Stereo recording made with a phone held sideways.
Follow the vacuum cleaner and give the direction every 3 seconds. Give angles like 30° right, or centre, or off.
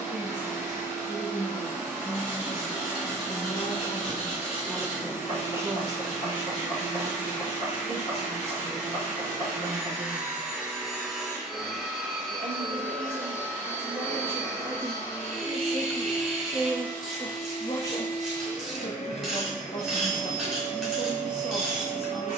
20° right, 20° right, 20° right, 10° right, 10° left, 40° left, 50° left, 60° left.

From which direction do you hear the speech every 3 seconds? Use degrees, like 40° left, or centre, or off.
60° left, centre, 40° right, 60° right, 40° right, centre, 50° left, 50° left.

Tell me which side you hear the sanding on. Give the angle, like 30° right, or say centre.
40° left.